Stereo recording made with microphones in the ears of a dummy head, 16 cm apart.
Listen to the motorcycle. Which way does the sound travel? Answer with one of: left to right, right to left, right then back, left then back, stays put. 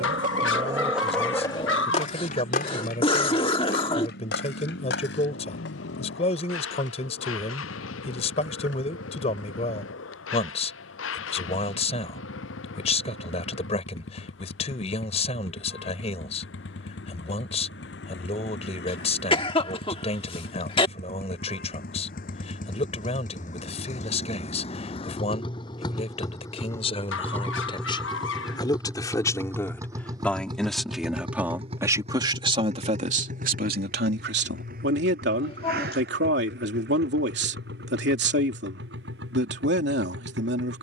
left to right.